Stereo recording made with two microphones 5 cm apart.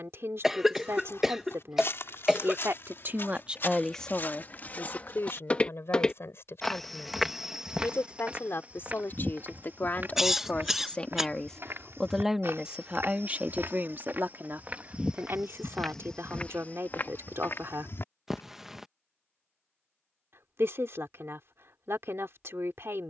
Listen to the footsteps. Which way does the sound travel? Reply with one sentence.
In this clip you hear the footsteps move from left to right and back again.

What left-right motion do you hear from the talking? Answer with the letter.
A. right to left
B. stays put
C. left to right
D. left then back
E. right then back
D.